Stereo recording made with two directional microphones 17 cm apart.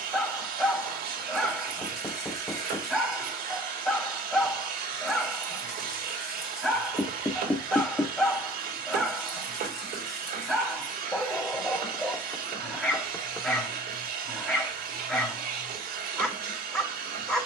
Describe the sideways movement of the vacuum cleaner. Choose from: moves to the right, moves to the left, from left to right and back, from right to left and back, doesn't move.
doesn't move.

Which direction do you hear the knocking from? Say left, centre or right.
centre.